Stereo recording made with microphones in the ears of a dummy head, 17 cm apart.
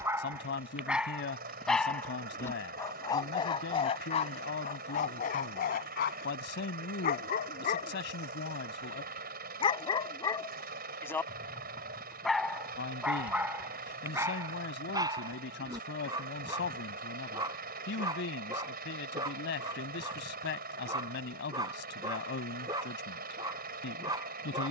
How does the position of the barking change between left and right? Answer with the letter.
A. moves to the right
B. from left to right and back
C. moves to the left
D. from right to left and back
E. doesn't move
D.